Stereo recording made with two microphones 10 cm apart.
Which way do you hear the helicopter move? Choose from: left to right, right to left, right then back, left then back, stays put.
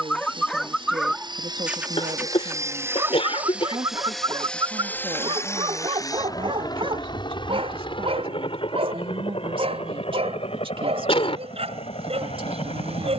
right to left.